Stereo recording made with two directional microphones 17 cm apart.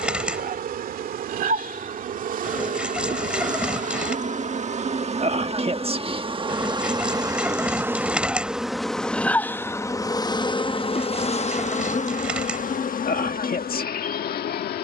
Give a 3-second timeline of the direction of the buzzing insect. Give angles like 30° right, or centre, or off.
60° right, 40° right, 20° right, 30° left, 60° left.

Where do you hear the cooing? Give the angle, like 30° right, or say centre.
10° right.